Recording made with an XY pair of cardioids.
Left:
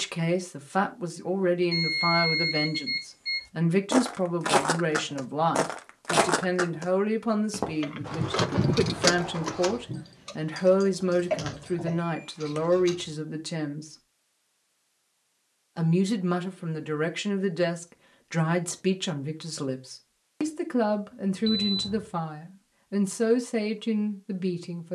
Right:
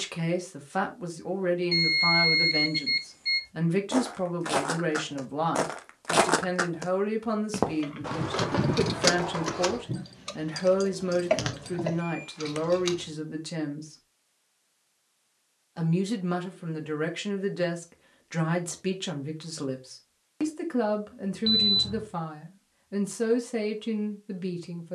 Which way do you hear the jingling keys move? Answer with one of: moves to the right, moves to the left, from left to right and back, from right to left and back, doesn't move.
moves to the right.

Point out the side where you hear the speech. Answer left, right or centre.
left.